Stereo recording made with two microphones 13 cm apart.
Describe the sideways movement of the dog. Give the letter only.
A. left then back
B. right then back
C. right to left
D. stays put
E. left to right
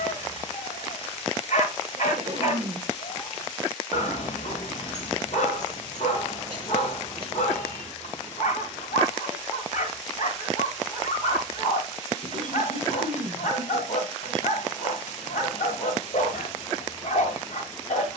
D.